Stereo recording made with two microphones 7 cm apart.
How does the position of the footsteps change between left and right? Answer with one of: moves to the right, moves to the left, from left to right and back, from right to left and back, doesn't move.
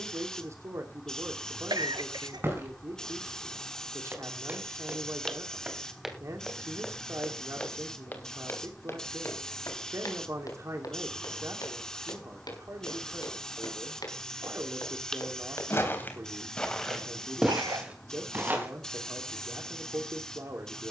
from right to left and back.